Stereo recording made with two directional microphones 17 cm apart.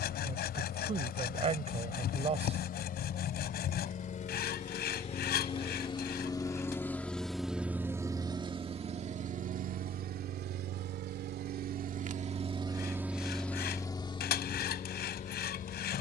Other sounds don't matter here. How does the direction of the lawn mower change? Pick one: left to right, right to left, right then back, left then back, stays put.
right then back.